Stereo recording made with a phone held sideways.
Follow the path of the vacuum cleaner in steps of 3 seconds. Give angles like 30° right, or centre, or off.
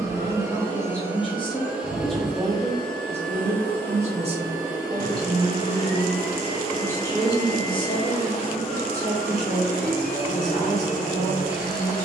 10° right, 20° left, 40° left, 50° left.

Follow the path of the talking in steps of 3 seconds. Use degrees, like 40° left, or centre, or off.
20° left, 30° right, 30° left, 50° left.